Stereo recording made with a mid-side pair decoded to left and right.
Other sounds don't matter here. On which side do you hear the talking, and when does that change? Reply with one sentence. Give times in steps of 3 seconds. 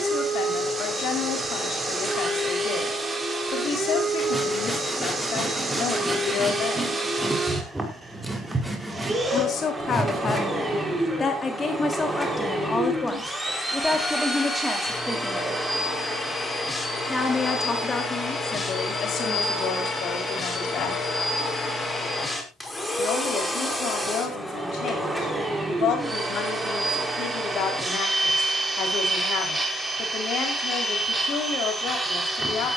You can hear the talking on the left from 0 s, in the centre from 12 s and on the left from 18 s.